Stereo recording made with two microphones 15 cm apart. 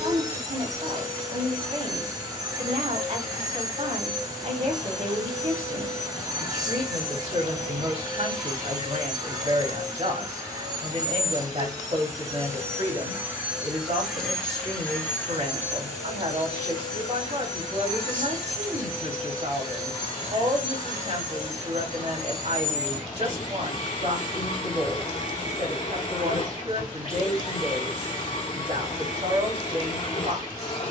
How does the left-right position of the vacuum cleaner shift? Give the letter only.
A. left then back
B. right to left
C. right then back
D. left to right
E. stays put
B.